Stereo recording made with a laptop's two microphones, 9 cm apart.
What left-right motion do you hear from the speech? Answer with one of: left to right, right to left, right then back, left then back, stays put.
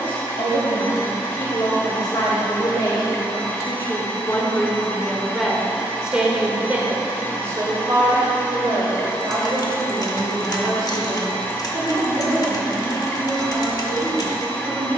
left to right.